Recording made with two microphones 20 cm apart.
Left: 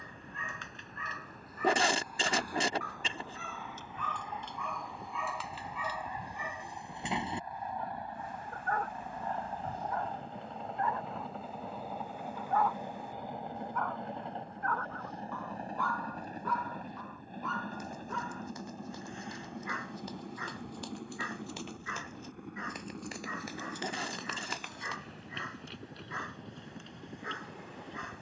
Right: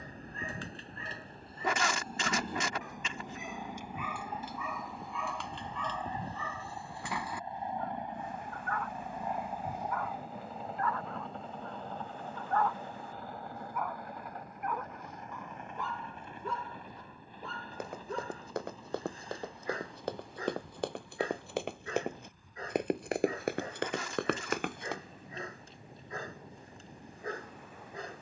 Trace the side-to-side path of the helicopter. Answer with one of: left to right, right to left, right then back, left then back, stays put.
right to left.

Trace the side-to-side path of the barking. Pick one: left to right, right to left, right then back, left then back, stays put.
left then back.